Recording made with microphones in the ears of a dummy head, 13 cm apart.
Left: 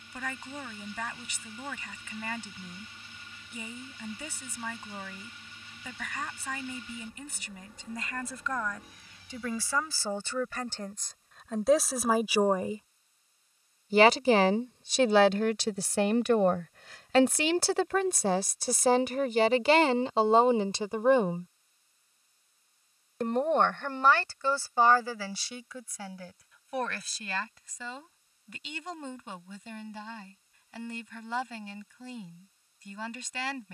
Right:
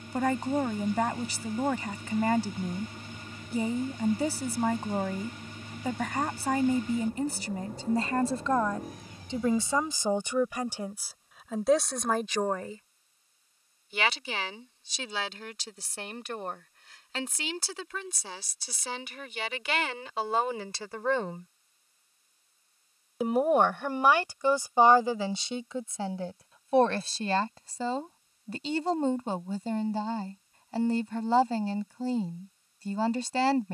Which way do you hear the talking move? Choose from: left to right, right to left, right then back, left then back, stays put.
left then back.